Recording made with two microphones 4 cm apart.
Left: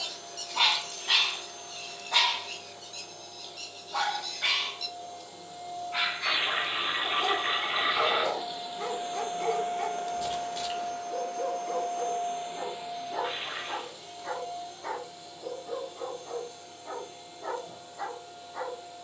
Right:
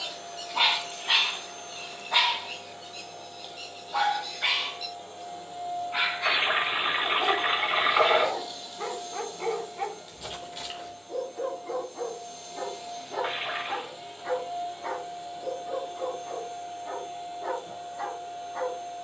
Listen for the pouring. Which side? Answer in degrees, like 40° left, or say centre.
30° right.